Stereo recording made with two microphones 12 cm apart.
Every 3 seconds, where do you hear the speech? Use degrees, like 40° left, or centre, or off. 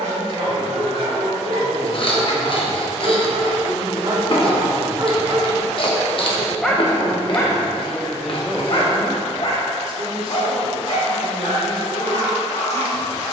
50° right, 20° right, 10° left, 50° right, 50° right.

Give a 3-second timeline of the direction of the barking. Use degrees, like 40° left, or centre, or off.
60° right, 40° right, 20° left, 60° left, 70° left.